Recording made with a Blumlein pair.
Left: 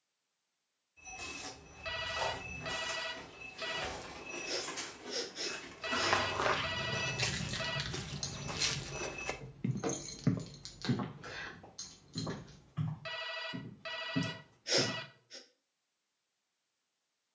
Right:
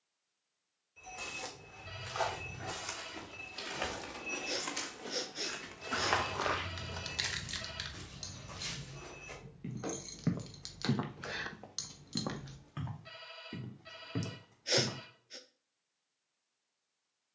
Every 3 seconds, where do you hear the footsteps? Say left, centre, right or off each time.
right, right, left, centre, right, off.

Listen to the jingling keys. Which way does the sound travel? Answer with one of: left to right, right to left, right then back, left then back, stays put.
left then back.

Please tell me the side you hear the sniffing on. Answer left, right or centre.
centre.